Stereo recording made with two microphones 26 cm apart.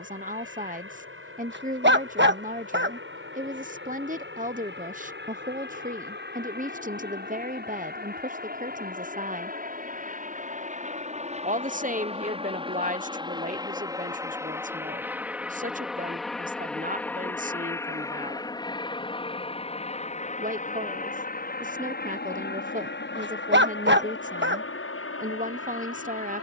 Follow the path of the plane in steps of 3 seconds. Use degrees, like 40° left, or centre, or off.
50° right, 50° right, 40° right, 30° right, 20° right, centre, 20° left, 40° left, 50° left.